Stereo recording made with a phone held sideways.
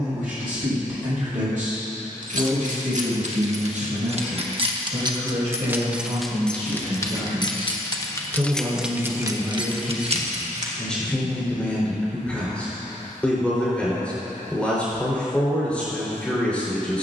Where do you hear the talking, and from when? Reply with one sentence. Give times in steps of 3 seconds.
In this clip you hear the talking on the right from 0 s and in the centre from 9 s.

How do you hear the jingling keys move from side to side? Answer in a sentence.
You can hear the jingling keys move from right to left and back again.